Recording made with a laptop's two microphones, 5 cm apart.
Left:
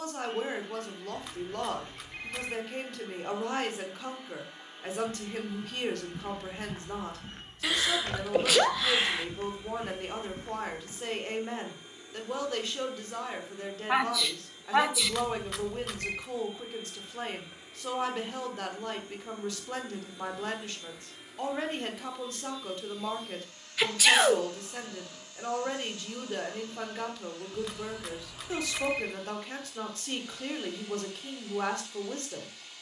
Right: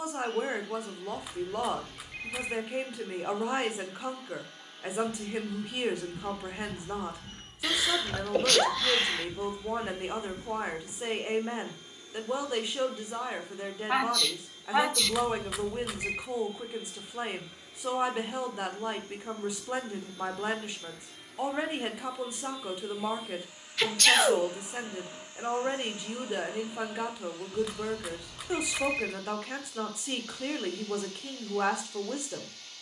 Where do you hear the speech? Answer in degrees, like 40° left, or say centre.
10° right.